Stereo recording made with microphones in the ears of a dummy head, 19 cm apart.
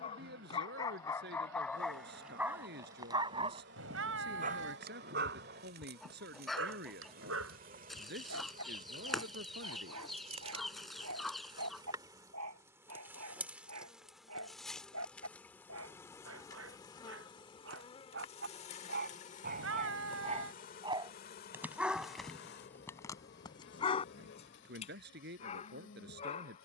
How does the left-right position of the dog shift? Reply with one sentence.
In this clip you hear the dog move from left to right and back again.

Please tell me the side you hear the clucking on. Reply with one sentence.
In this clip you hear the clucking in the centre.